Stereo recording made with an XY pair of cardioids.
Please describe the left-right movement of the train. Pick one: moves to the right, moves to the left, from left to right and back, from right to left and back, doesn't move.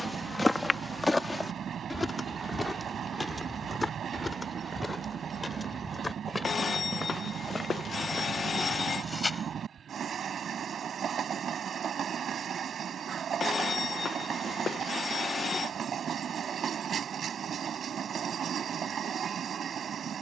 doesn't move.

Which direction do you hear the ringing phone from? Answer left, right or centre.
left.